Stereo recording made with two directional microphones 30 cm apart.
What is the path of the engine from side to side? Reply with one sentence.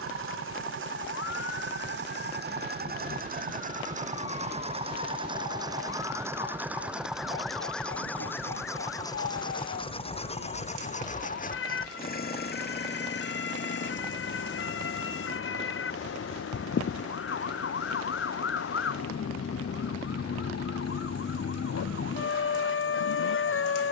You can hear the engine move to the left.